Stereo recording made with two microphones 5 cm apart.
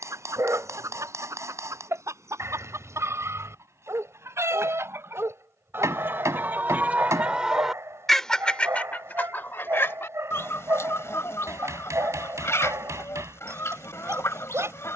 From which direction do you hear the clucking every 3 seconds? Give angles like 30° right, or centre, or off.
70° right, 60° right, 10° right, 60° left, 60° left.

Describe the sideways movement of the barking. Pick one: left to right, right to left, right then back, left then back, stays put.
stays put.